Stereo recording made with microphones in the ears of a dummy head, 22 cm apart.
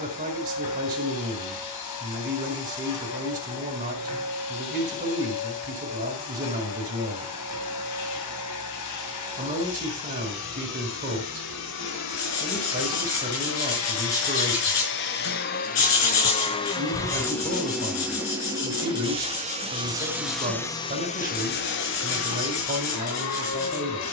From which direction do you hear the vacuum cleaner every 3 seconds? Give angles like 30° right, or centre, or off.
80° left, 80° left, 80° left, 70° left, 60° left, 20° left, 10° right, 60° left.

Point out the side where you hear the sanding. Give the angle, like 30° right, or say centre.
70° left.